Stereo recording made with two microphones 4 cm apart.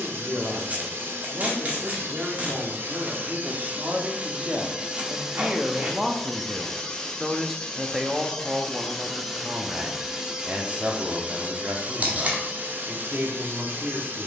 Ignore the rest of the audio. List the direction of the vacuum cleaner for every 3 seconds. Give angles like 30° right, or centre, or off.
60° right, 20° right, 10° left, 20° right, 50° right.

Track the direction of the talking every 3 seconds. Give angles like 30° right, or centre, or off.
40° right, 30° right, 10° right, 40° right, 40° right.